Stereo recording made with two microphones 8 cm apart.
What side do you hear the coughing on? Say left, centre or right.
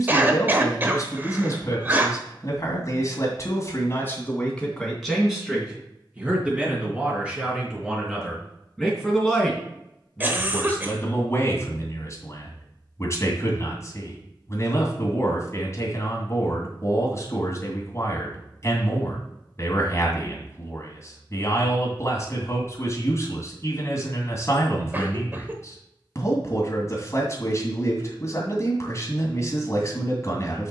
right.